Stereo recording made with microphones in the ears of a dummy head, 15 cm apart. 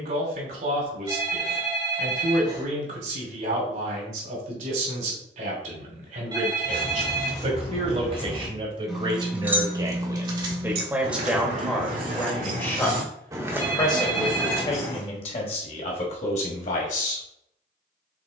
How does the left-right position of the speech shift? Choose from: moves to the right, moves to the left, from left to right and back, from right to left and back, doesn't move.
moves to the left.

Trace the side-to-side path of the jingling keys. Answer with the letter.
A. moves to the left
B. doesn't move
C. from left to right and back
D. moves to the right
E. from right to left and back
C.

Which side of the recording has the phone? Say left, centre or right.
right.